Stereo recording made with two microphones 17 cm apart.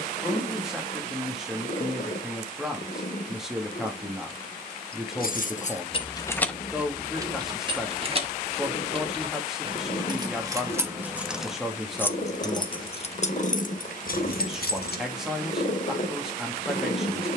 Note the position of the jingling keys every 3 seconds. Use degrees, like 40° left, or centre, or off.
off, 50° left, 10° right, 20° right, 50° left, off.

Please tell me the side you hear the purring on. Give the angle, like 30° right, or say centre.
50° left.